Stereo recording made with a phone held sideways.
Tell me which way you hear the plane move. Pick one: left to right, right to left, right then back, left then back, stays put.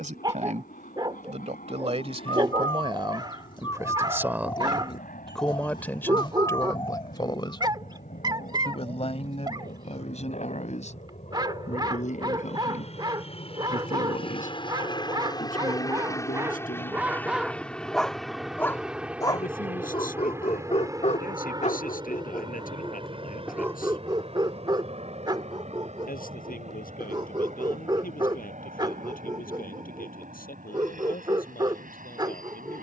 left to right.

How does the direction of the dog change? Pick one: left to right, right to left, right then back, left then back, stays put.
left then back.